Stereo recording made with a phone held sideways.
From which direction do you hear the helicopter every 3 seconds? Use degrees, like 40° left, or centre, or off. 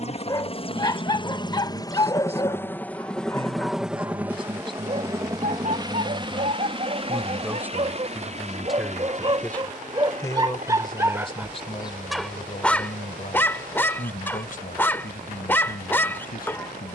30° left, 10° right, 40° right, 50° right, 60° right, 60° right.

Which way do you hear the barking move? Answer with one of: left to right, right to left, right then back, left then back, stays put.
right then back.